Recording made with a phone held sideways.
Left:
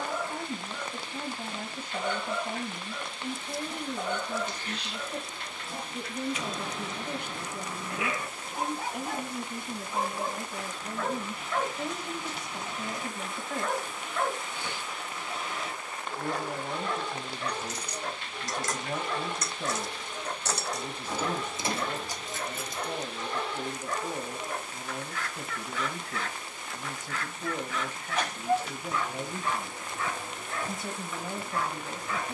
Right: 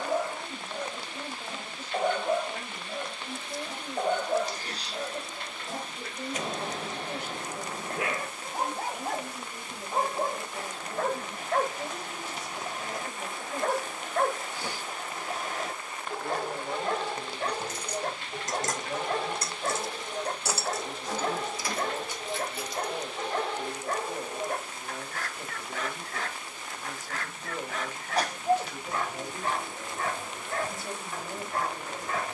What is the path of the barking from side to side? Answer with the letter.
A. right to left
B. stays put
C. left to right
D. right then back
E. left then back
B.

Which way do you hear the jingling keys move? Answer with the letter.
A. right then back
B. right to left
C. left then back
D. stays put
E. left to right
B.